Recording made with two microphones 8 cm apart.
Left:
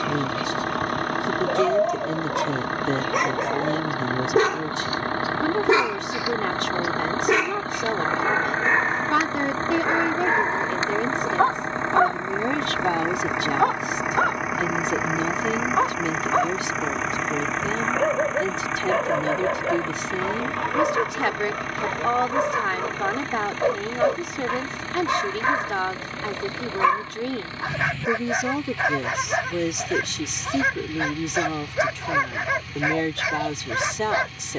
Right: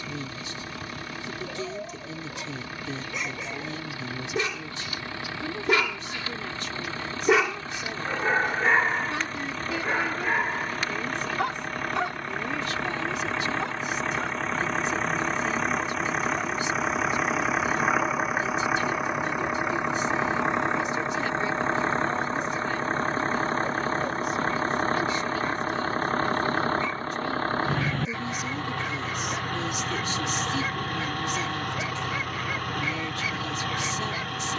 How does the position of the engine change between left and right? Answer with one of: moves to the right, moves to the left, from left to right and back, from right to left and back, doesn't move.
moves to the right.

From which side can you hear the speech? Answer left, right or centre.
left.